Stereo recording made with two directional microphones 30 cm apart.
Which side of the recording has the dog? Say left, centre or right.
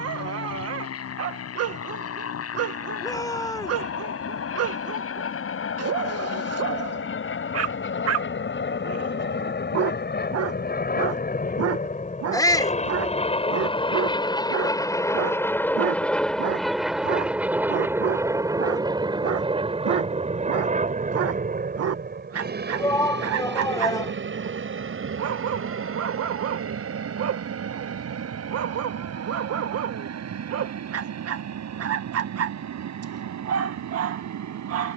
right.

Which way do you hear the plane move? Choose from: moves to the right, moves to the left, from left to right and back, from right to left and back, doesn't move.
moves to the right.